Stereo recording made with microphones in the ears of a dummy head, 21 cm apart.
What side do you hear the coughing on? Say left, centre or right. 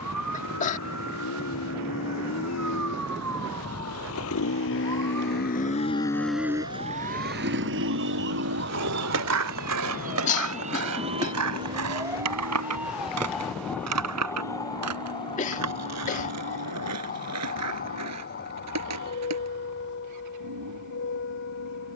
left.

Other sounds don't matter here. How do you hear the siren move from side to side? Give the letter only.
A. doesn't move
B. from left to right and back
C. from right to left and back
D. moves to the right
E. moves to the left
E.